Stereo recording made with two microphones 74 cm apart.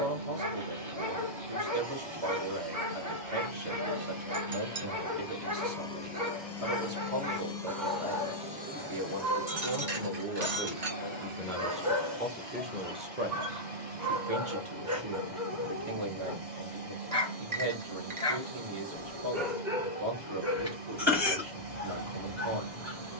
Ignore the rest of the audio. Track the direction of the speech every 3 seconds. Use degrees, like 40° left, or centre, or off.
50° right, 50° right, 50° right, 20° right, 20° right, 50° right, 50° right, 50° right.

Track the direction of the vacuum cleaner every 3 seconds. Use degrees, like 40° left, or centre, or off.
50° right, 20° right, centre, 30° right, 50° right, 50° right, 50° right, 50° right.